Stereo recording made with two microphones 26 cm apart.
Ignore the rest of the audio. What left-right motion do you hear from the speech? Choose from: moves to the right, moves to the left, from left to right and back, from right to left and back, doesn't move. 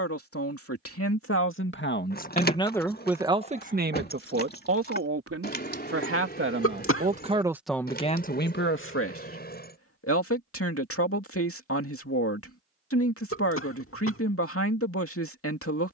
from left to right and back.